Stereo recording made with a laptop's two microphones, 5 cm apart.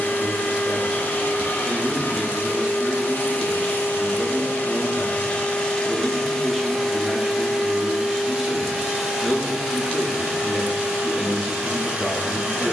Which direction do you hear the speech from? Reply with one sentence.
In this clip you hear the speech in the centre.